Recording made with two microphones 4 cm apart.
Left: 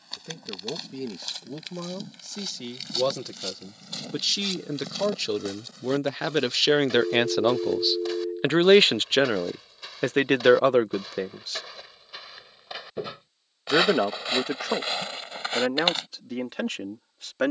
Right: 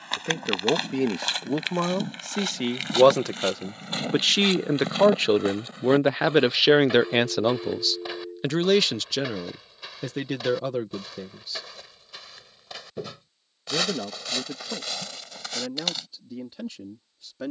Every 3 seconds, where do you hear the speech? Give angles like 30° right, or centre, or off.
60° right, 50° right, centre, 60° left, 80° left, 80° left.